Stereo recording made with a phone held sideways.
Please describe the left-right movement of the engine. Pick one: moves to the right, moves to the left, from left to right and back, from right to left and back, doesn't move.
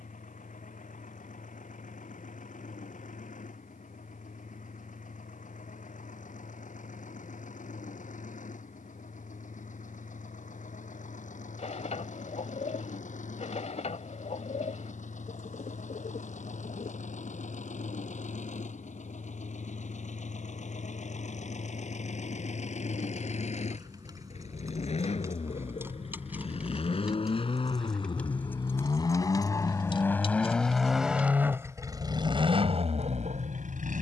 moves to the right.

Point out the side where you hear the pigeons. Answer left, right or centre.
left.